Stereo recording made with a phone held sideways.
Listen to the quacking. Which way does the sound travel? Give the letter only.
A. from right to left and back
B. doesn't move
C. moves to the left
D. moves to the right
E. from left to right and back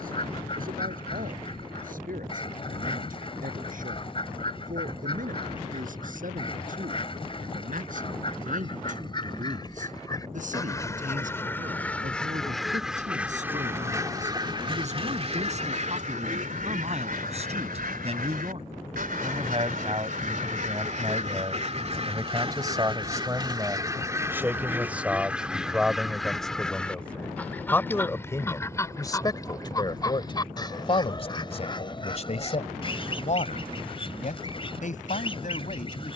E.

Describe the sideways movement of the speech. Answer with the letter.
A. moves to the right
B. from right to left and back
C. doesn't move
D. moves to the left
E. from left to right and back
D.